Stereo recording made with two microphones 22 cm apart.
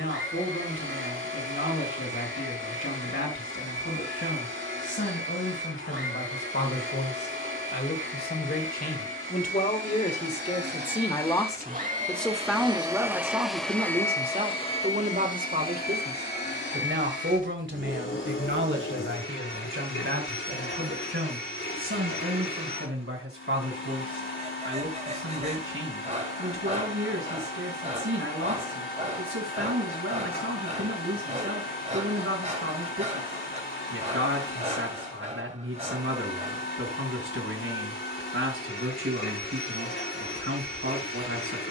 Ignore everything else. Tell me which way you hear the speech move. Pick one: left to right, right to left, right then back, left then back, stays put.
left to right.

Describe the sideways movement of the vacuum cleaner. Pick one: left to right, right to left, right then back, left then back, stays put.
right to left.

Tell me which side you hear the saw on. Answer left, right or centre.
right.